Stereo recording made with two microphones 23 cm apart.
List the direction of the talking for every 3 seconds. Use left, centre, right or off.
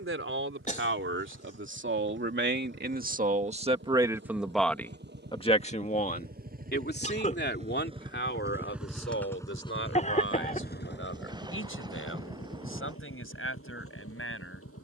right, centre, left, left, left.